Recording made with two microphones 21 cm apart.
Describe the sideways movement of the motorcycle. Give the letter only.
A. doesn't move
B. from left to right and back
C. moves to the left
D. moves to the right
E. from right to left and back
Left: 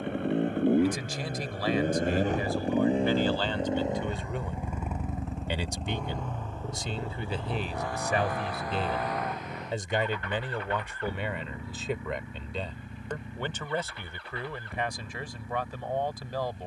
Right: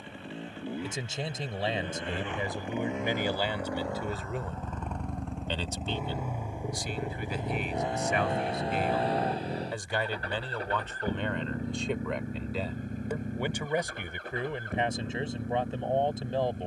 D.